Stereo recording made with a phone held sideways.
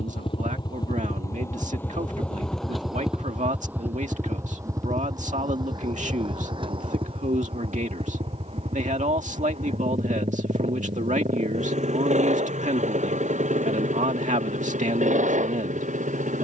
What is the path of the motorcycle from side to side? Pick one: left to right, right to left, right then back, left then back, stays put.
left to right.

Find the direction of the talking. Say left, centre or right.
right.